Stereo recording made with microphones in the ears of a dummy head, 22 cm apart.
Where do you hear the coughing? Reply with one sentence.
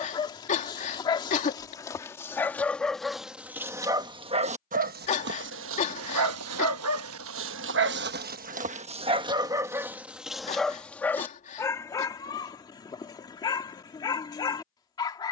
You can hear the coughing on the left.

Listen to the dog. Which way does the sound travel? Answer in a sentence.
In this clip you hear the dog go right and come back.